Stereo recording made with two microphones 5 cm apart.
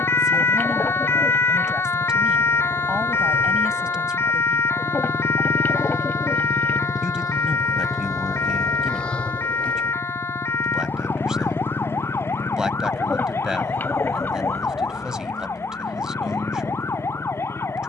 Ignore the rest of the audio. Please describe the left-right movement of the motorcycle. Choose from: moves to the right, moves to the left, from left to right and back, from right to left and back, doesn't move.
moves to the left.